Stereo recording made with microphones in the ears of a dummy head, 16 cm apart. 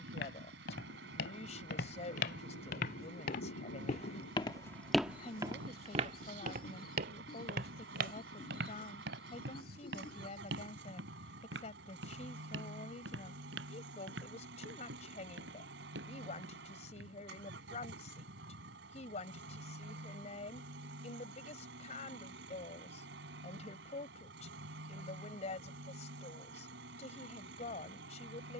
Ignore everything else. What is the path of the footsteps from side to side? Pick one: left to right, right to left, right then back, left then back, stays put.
left to right.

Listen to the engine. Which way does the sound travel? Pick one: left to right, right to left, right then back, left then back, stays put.
stays put.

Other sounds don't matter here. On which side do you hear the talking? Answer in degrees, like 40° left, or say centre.
40° left.